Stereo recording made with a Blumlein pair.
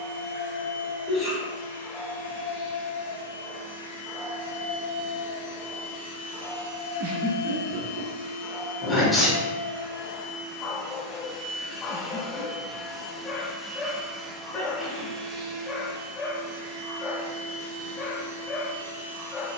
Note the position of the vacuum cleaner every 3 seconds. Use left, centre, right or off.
left, left, left, left, centre, right, right.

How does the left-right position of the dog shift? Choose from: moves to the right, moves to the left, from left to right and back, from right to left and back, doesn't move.
doesn't move.